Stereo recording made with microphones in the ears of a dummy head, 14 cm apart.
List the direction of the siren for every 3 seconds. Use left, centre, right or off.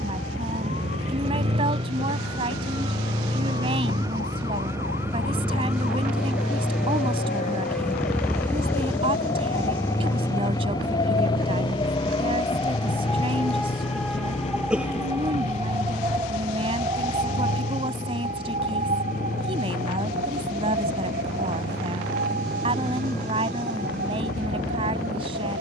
left, left, left, left, centre, right, right, right, right.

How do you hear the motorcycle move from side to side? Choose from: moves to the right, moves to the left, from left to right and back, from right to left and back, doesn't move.
moves to the left.